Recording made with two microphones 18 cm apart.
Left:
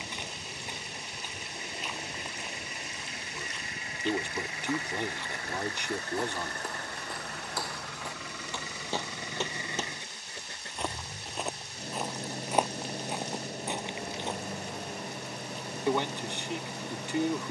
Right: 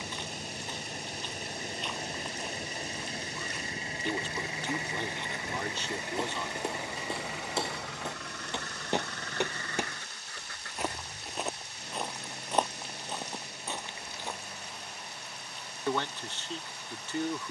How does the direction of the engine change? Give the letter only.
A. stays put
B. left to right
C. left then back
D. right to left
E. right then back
D.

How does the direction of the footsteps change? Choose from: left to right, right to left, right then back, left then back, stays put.
right then back.